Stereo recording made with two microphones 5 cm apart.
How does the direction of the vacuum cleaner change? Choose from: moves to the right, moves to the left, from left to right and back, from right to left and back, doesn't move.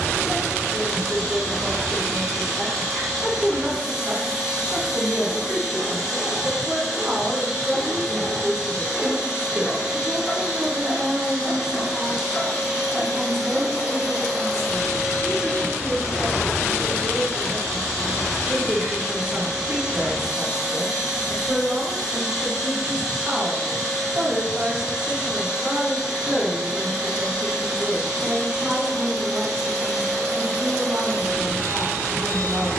doesn't move.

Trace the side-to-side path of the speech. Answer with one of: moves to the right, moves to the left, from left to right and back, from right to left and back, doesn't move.
doesn't move.